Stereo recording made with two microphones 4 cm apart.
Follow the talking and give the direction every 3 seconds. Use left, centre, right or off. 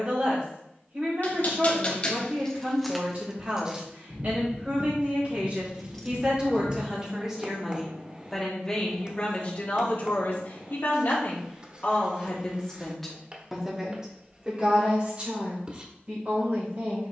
right, right, centre, left, centre, right.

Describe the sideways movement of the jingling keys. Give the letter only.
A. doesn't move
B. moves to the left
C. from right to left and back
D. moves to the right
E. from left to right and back
E.